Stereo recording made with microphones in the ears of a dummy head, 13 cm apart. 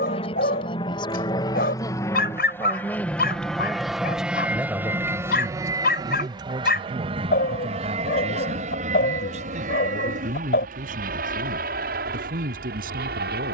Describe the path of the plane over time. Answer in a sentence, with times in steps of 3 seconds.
In this clip you hear the plane on the left from 0 s, in the centre from 3 s and on the right from 6 s.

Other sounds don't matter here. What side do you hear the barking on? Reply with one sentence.
You can hear the barking on the left.